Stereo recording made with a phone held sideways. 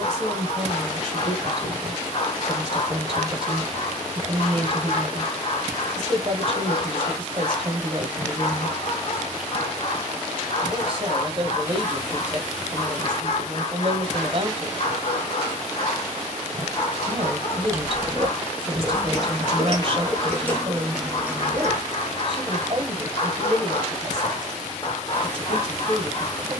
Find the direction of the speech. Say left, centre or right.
right.